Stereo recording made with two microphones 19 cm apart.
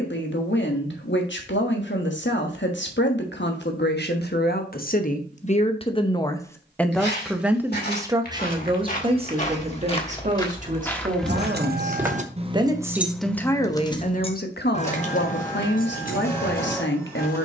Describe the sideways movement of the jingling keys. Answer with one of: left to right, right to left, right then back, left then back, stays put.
right to left.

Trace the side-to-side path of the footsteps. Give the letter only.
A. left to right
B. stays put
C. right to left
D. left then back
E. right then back
A.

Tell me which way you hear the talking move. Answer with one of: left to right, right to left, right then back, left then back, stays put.
right then back.